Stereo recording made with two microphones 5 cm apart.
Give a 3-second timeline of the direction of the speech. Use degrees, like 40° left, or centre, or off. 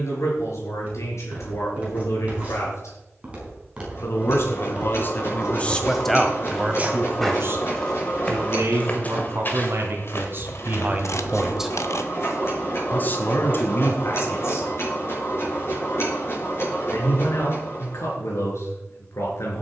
70° left, 40° left, 40° right, 40° right, 50° left, 70° left, 70° left.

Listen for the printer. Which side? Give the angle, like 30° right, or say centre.
50° left.